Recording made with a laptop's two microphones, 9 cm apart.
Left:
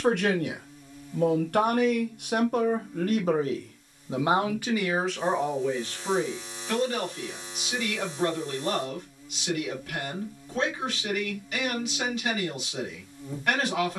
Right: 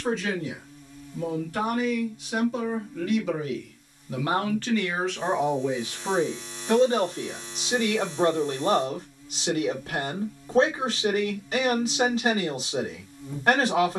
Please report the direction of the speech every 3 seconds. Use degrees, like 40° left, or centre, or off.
60° left, 10° left, 30° right, 30° right, 30° right.